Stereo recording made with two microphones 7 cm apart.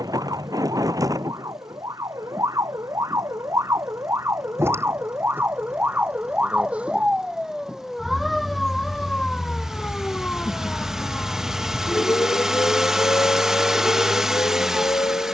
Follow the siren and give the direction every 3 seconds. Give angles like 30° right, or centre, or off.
50° right, 40° right, 10° right, 20° left, 40° left.